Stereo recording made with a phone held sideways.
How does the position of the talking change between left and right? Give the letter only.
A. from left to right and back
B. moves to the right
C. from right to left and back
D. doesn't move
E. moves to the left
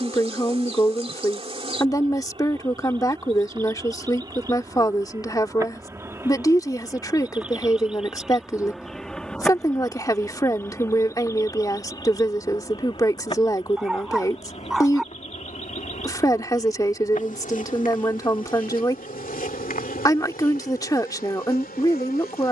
D.